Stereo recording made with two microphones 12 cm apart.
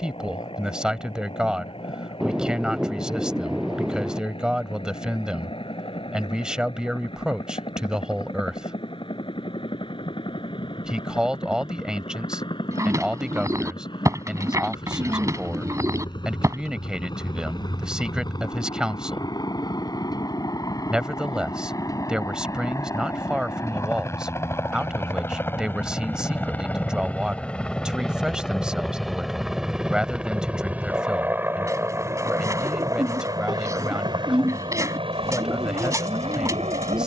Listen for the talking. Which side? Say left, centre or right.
centre.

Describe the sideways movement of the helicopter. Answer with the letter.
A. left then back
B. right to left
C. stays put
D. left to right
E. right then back
D.